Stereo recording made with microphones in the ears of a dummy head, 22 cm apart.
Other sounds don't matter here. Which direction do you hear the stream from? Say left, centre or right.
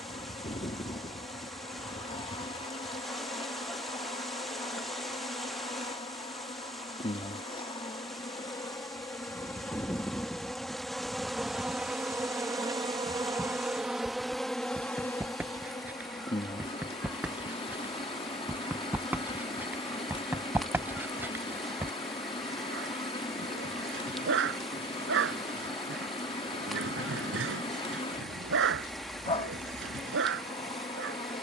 centre.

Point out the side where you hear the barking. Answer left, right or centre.
right.